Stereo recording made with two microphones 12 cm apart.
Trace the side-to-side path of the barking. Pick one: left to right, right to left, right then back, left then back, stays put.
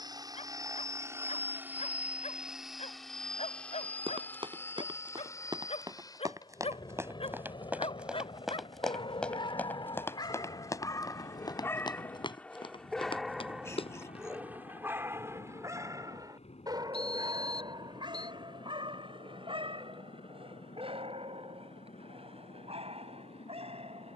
left to right.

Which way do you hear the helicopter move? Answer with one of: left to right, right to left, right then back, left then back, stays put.
right to left.